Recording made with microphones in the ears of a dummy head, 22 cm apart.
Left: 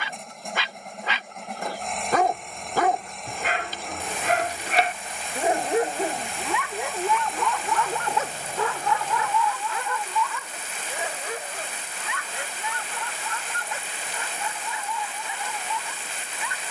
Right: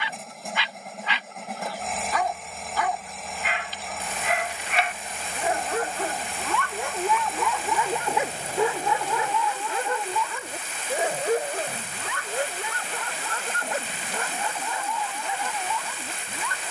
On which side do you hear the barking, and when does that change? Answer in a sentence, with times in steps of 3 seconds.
In this clip you hear the barking on the left from 0 s, in the centre from 6 s and on the right from 9 s.